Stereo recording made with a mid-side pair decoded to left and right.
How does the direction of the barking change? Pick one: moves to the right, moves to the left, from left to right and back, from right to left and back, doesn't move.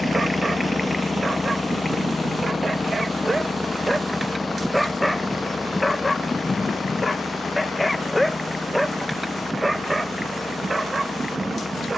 from right to left and back.